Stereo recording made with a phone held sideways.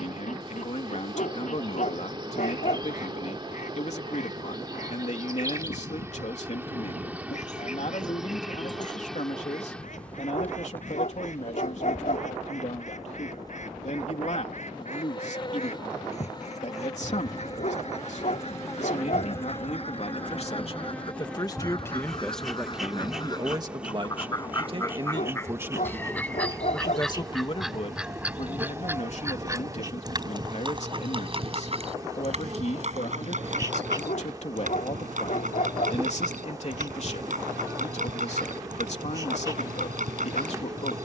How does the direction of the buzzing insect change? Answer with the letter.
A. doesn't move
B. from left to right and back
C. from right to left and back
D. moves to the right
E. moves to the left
C.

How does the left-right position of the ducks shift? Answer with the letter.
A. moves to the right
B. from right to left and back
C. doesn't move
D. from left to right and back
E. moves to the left
A.